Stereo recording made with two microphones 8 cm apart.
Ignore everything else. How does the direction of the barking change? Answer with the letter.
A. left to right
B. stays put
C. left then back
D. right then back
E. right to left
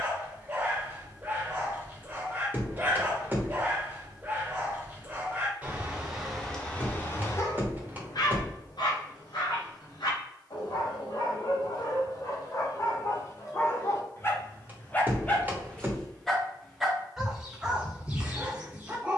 C.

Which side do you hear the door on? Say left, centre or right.
right.